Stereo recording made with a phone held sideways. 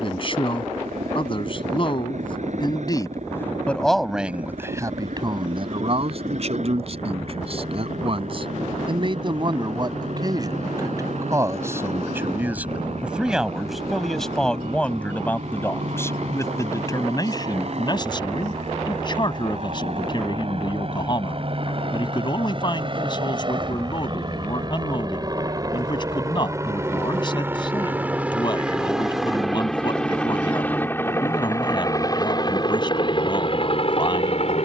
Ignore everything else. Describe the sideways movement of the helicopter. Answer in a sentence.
You can hear the helicopter move to the left.